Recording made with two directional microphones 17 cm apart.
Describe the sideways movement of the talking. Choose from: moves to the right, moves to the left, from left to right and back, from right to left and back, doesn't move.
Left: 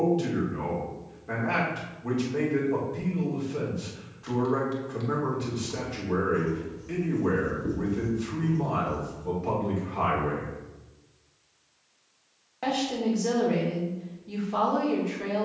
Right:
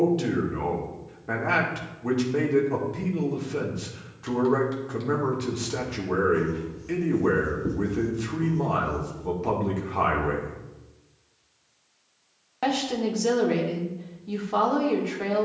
doesn't move.